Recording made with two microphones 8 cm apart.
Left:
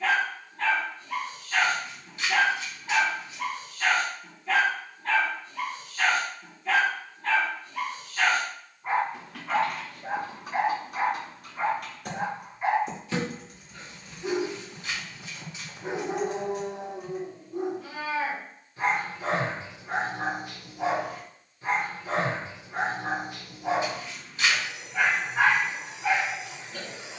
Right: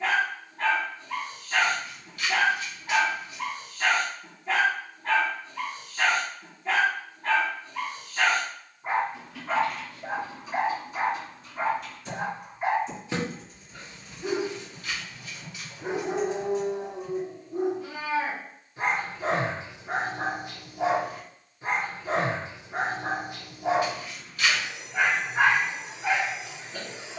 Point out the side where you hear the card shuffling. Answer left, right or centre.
left.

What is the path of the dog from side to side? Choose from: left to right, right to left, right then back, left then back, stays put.
stays put.